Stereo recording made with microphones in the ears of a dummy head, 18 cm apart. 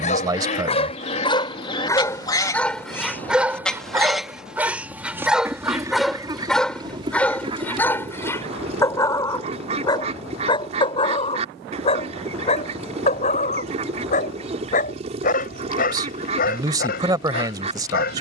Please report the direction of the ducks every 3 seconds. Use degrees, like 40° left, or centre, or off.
30° left, centre, 30° right, 30° right, 30° right, 30° right.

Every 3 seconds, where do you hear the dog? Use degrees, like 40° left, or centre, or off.
20° left, 10° right, 10° left, 20° left, 40° left, 50° left.